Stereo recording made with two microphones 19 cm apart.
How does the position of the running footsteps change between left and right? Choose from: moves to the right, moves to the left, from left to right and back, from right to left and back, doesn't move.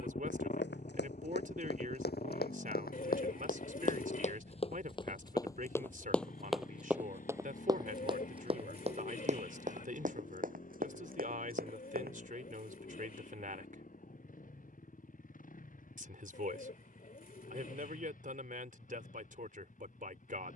moves to the right.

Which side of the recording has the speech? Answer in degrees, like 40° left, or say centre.
50° right.